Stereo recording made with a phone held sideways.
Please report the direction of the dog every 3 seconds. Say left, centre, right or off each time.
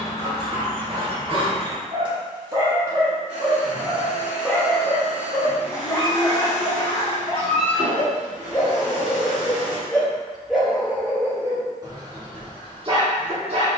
right, centre, left, centre, right.